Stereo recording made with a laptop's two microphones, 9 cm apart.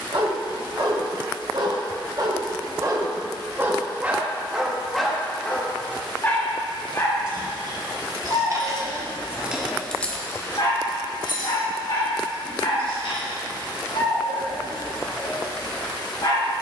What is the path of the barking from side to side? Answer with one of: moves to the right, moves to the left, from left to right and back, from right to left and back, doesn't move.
moves to the left.